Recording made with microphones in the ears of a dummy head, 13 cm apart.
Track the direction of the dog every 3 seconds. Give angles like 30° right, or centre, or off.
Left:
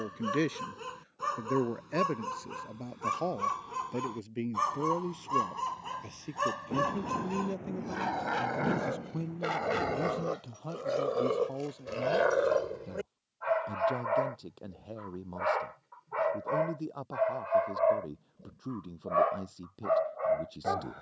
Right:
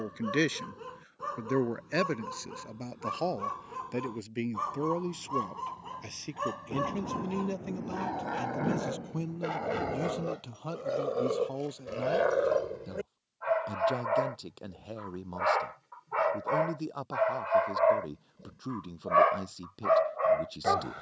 60° left, 50° left, 50° left, 30° left, 10° left, 30° right, 60° right.